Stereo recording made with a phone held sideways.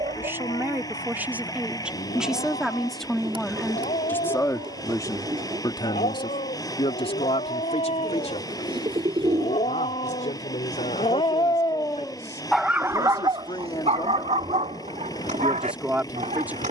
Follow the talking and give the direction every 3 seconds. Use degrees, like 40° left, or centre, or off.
10° right, 20° left, 50° left, 70° left, 50° left, 10° right.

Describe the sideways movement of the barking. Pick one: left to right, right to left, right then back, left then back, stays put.
left to right.